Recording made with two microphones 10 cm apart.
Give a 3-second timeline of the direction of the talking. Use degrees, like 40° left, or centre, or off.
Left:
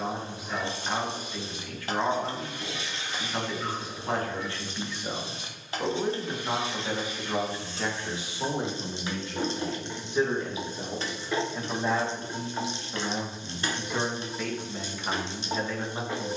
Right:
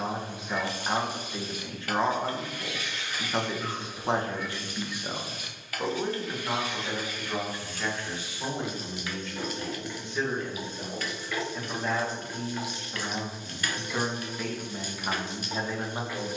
30° right, 20° right, 20° left, 20° left, centre, 10° right.